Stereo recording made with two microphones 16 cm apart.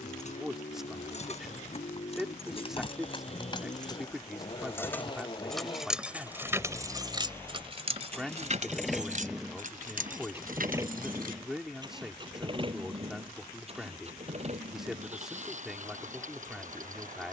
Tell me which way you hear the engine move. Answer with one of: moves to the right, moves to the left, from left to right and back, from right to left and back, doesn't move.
moves to the right.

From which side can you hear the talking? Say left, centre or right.
centre.